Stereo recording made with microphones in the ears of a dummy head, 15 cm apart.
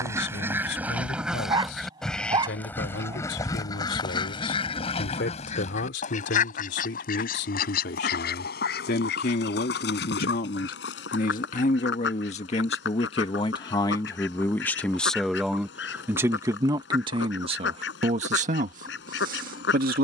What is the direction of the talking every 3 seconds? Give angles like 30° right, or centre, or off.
70° left, 70° left, 60° left, 50° left, 30° left, 20° right, 50° right.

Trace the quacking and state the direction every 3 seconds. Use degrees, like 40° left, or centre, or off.
centre, 30° left, 50° left, 70° left, 70° left, 70° left, 70° left.